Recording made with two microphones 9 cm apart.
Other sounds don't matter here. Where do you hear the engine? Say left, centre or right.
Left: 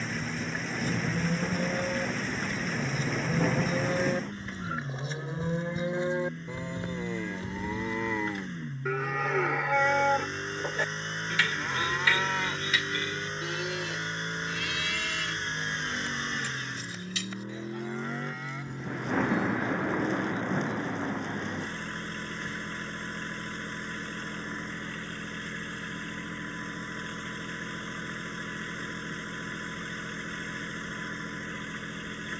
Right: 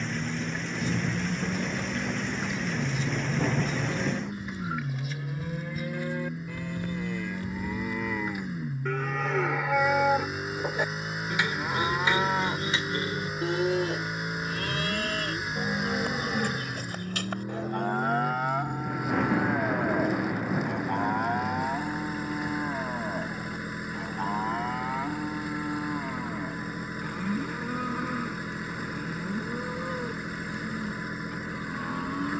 centre.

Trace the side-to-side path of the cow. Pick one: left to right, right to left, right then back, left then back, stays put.
left to right.